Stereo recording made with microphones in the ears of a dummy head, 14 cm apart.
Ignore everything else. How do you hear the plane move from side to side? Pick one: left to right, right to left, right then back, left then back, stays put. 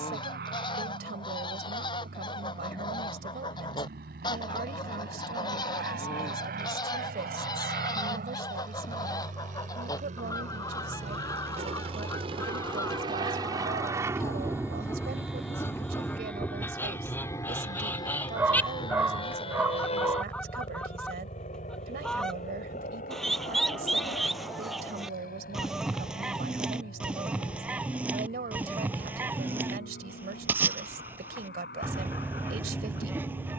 right to left.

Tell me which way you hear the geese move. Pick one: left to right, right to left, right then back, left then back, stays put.
left to right.